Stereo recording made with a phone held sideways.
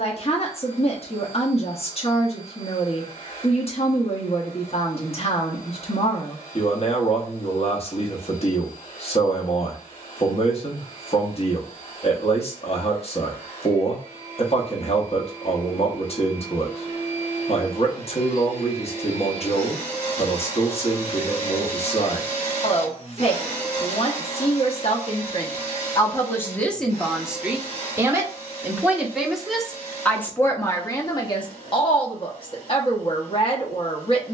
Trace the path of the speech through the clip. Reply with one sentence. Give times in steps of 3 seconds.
You can hear the speech on the left from 0 s, in the centre from 27 s and on the left from 30 s.